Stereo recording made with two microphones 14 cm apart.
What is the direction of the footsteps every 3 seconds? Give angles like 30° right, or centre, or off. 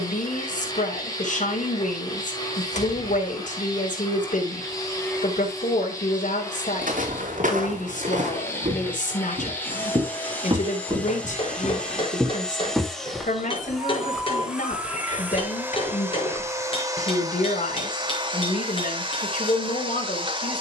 off, off, 70° right, 30° right, 10° left, 30° left, off.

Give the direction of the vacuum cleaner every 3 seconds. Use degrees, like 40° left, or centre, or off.
30° left, 20° left, 20° left, 10° left, centre, 20° right, 40° right.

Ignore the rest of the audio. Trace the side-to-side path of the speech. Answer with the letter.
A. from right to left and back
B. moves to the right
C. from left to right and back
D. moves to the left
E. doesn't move
E.